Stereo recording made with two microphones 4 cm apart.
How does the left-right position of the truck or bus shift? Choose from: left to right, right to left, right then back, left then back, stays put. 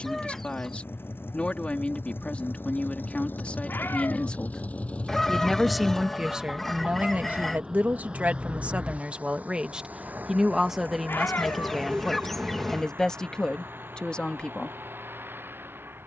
left to right.